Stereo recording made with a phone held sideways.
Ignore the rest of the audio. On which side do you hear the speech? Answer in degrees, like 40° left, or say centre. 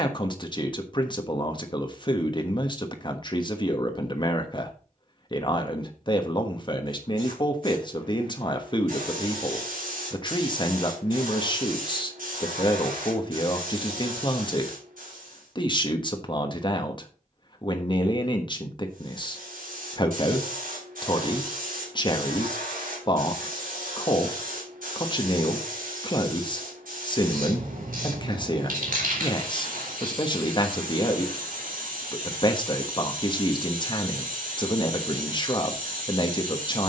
30° left.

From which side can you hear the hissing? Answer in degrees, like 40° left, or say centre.
70° right.